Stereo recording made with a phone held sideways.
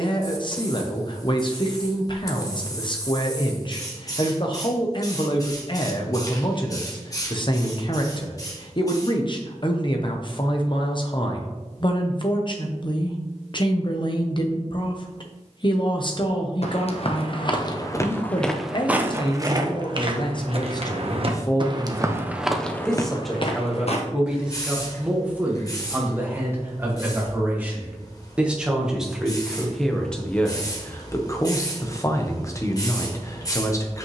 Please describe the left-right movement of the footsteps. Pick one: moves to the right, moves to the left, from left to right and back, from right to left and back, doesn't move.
from left to right and back.